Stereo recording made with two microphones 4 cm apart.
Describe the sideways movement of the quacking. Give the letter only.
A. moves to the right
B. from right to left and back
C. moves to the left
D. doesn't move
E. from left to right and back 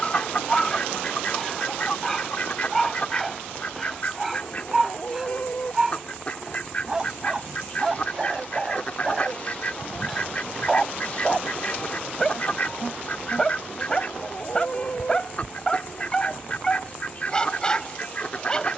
D.